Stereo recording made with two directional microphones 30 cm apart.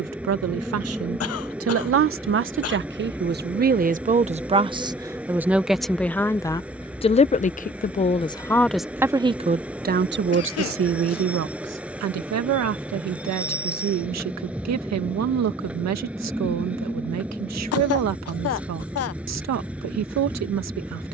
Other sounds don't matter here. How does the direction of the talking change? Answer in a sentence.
You can hear the talking move from right to left and back again.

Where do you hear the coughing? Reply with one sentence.
In this clip you hear the coughing on the left.